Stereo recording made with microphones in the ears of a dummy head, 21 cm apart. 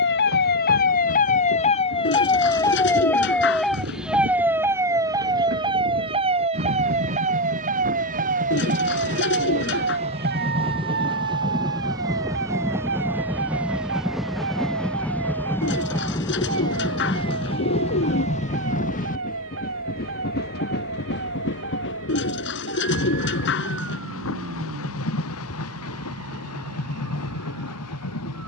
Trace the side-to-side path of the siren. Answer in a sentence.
You can hear the siren travel towards the right.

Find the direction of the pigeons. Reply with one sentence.
In this clip you hear the pigeons on the left.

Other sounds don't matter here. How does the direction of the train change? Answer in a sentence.
In this clip you hear the train travel towards the left.